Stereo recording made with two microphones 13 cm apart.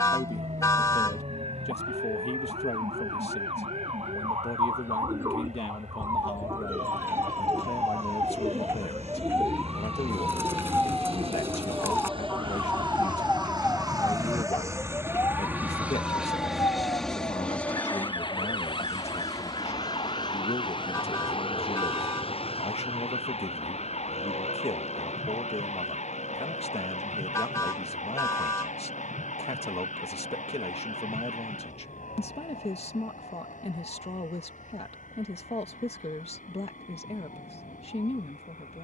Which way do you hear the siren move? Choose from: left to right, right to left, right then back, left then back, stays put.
right to left.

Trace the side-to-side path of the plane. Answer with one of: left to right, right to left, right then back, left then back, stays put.
right to left.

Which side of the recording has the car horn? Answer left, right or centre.
left.